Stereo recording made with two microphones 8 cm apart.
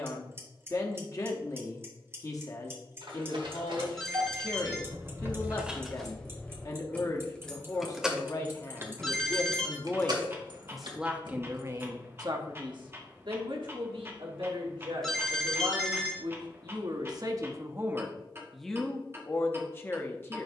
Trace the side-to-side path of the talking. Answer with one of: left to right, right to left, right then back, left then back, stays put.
right then back.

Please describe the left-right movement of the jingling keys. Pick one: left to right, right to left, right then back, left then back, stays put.
left then back.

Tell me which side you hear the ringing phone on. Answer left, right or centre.
centre.